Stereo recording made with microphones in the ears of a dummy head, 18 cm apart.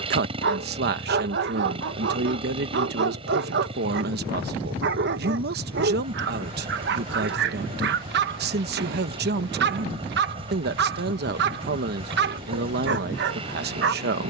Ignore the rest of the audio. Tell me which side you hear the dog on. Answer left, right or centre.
right.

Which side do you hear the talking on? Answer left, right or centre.
right.